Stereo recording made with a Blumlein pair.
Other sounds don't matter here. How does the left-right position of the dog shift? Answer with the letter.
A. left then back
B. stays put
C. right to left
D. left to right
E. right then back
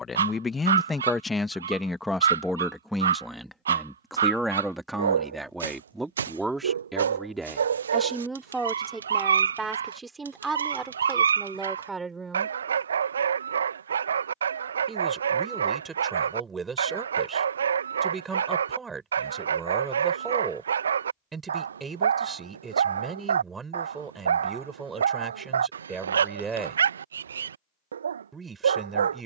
B.